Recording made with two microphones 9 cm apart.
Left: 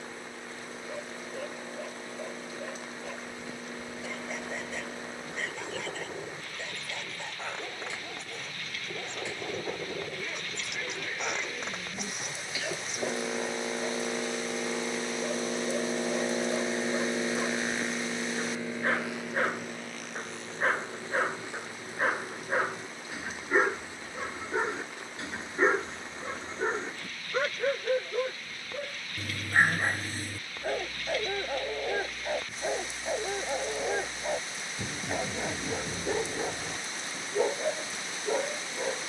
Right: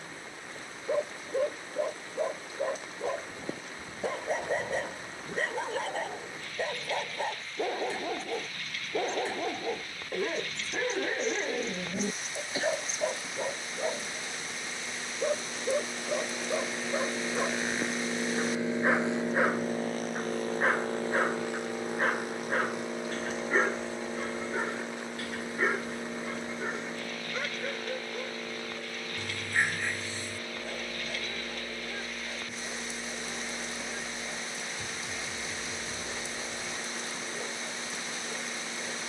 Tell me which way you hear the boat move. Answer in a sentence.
In this clip you hear the boat move to the right.